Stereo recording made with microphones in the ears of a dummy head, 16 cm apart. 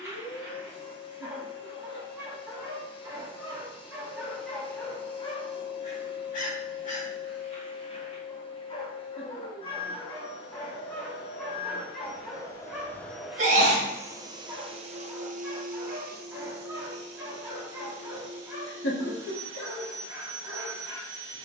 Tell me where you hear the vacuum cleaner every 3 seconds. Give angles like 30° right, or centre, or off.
30° left, 30° left, 30° left, 30° left, centre, 60° right, 70° right.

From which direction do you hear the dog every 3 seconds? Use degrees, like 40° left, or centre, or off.
20° right, centre, 40° left, 10° left, 10° right, 10° right, 10° right.